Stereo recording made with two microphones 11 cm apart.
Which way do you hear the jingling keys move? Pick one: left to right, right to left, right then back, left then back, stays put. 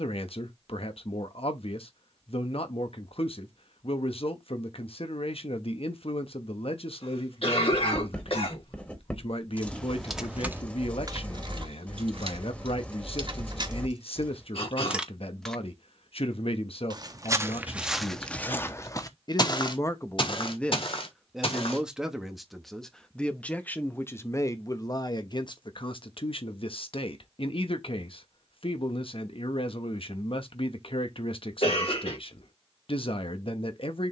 right then back.